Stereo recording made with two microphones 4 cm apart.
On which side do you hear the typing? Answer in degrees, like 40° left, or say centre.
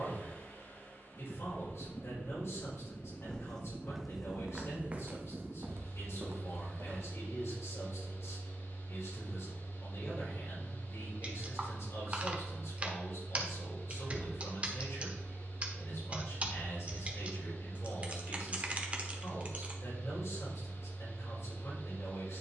30° right.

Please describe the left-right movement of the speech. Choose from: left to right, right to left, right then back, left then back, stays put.
stays put.